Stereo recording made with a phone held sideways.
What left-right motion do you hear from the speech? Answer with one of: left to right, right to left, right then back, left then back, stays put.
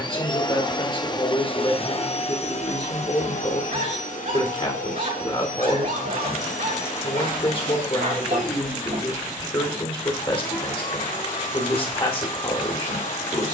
stays put.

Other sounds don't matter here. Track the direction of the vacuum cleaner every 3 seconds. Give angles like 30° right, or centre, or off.
40° left, 60° left, 70° left, 70° left, 70° left.